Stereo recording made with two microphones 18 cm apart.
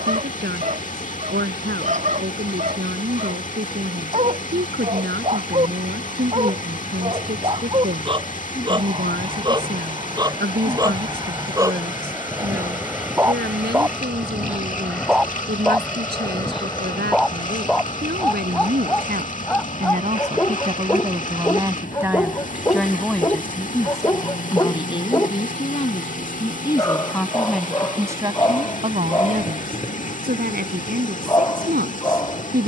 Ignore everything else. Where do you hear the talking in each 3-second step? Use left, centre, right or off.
right, right, right, right, right, right, right, centre, left, right, right.